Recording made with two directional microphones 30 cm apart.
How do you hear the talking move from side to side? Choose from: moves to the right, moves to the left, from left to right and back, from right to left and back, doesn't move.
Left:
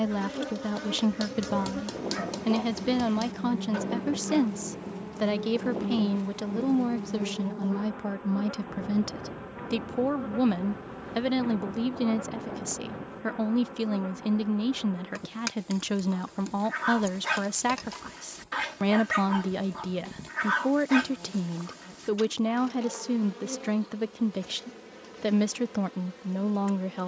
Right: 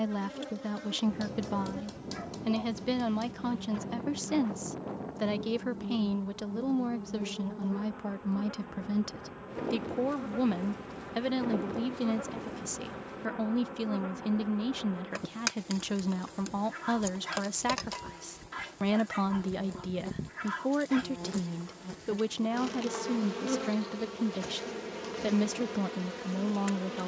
doesn't move.